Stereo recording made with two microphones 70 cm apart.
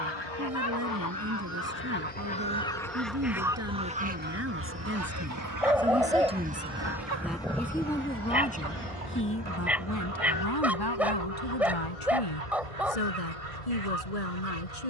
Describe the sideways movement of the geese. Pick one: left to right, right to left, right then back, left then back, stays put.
left to right.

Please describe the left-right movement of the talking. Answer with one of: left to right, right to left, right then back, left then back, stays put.
right to left.